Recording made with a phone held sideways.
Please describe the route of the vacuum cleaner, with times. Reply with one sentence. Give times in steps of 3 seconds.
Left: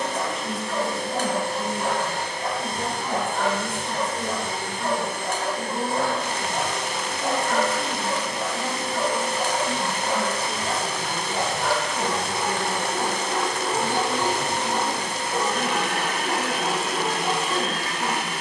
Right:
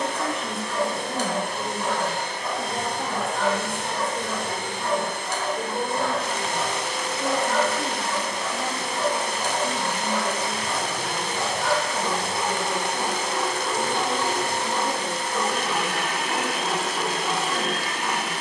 In this clip you hear the vacuum cleaner on the right from 0 s, in the centre from 12 s and on the right from 15 s.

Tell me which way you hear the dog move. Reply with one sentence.
You can hear the dog stay put.